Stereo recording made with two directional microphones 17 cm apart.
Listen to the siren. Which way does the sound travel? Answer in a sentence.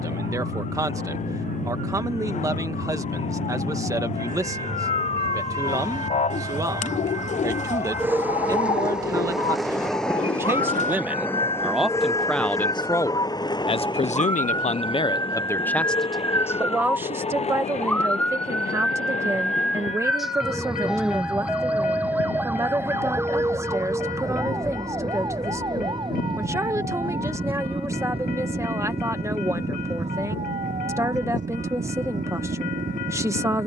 You can hear the siren move from left to right.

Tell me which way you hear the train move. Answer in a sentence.
In this clip you hear the train travel towards the left.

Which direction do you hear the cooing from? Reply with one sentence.
You can hear the cooing on the left.